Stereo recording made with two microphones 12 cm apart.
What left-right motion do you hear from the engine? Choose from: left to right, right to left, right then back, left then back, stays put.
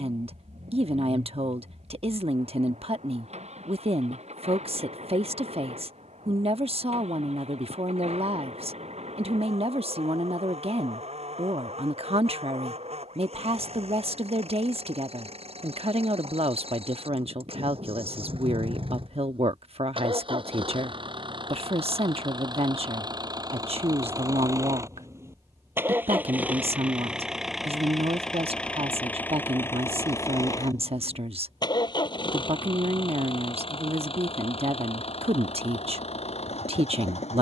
right to left.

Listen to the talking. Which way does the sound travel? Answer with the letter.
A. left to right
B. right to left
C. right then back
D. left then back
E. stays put
E.